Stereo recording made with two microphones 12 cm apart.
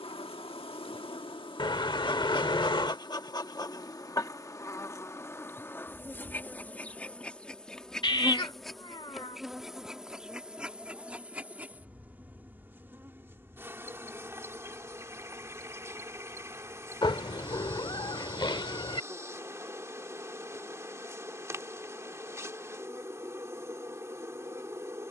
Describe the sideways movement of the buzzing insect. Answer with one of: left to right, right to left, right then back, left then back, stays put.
left to right.